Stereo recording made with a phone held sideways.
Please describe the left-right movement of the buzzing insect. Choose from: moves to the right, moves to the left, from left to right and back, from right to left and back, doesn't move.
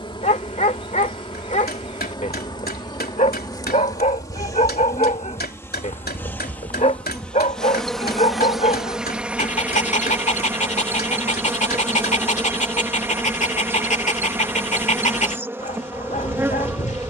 moves to the right.